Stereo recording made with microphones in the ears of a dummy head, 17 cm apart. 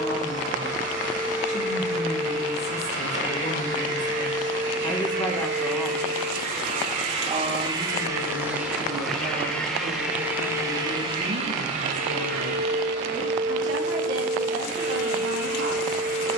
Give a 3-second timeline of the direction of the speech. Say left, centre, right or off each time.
left, left, right, right, right, right.